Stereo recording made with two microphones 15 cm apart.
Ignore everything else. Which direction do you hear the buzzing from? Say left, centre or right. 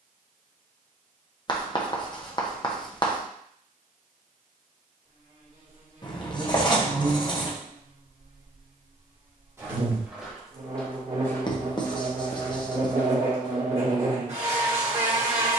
right.